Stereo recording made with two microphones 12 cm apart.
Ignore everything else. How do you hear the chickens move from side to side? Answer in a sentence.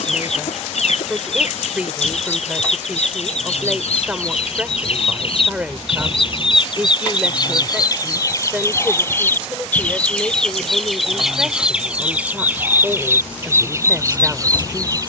In this clip you hear the chickens move from left to right.